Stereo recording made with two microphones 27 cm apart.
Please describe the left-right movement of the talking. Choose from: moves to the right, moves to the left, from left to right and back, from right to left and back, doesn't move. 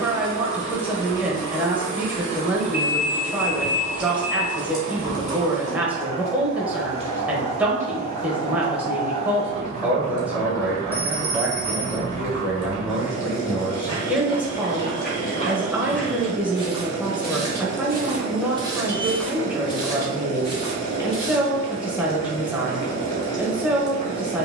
doesn't move.